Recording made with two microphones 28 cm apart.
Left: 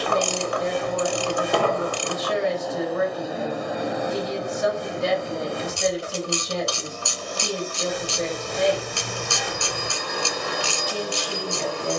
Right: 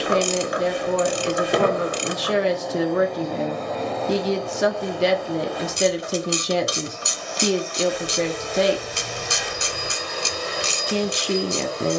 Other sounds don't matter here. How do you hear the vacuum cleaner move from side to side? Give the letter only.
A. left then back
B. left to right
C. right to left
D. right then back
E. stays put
C.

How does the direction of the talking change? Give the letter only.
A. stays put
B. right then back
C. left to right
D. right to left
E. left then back
A.